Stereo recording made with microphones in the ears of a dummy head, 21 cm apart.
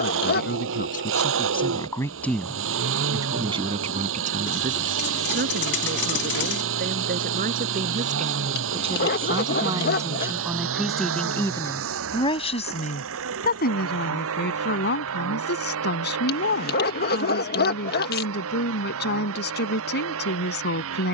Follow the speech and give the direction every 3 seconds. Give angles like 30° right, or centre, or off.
30° left, 40° right, 40° right, 10° right, 40° left, 50° left, 50° left.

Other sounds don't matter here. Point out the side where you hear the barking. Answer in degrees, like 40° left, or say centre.
50° left.